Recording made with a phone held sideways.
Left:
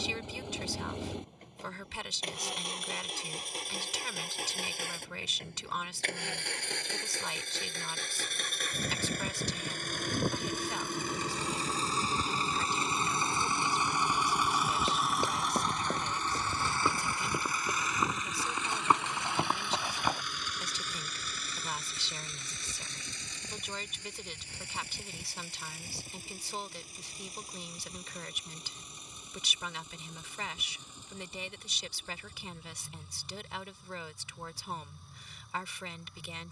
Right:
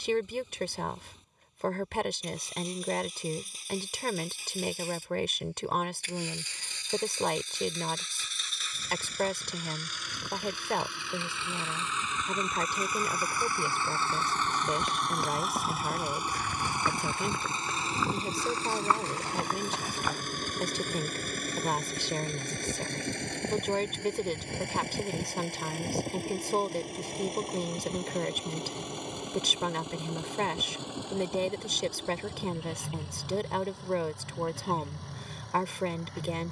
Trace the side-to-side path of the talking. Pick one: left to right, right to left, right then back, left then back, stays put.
stays put.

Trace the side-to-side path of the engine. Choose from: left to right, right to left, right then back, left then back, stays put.
left to right.